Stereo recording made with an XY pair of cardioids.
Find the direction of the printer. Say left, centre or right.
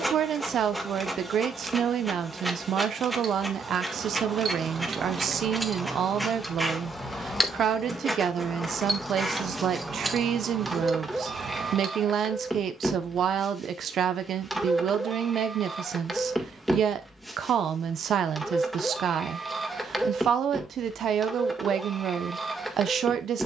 centre.